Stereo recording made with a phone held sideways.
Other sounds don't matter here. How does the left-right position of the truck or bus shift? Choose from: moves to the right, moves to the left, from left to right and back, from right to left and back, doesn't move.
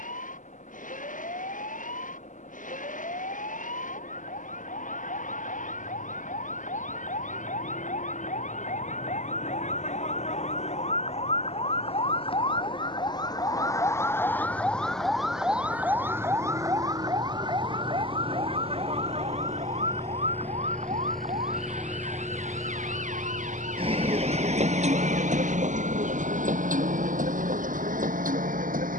moves to the right.